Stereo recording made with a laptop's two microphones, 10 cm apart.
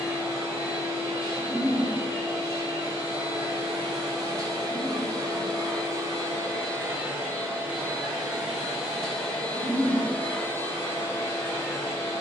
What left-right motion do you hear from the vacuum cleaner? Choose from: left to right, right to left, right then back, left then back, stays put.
right to left.